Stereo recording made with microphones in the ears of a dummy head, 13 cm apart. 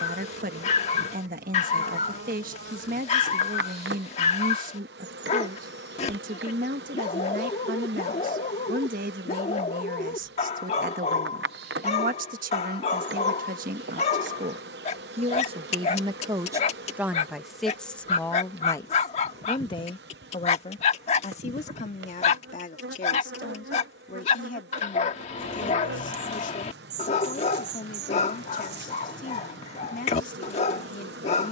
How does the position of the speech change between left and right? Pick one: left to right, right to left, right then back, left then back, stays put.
right to left.